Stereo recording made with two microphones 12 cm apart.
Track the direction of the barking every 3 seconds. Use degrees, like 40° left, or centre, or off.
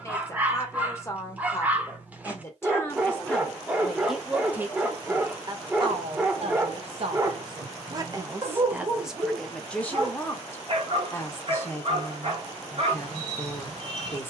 10° right, 10° right, 30° right, 50° right, 50° right.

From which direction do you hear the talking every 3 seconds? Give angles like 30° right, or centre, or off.
20° left, 10° right, 40° right, 10° left, 20° left.